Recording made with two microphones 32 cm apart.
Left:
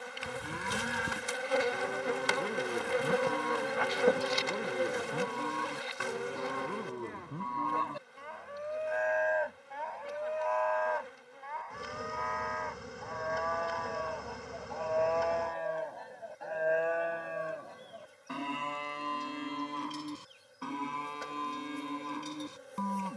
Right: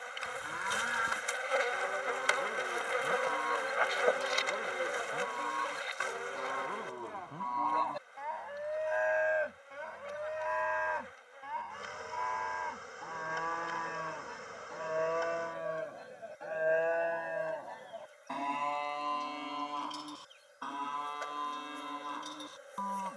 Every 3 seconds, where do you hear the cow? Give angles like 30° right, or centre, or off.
40° left, 40° left, 20° left, 20° right, 40° right, centre, 30° left, 40° left.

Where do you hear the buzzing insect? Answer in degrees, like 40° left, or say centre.
50° left.